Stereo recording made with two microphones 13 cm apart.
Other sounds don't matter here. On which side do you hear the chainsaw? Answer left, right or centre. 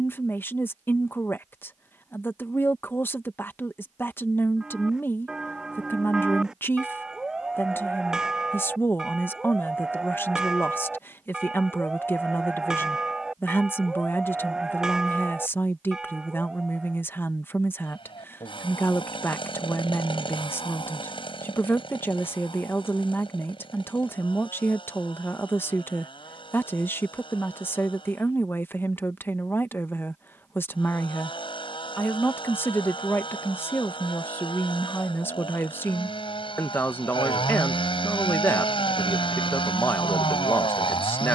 left.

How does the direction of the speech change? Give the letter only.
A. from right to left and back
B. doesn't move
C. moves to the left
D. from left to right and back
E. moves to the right
B.